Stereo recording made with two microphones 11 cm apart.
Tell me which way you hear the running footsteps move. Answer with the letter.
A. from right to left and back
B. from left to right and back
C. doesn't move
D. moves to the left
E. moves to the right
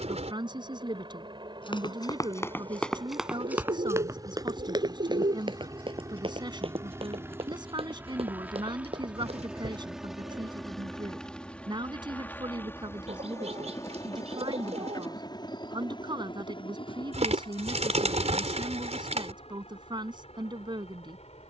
E.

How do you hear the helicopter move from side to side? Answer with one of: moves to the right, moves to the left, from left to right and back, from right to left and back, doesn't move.
moves to the left.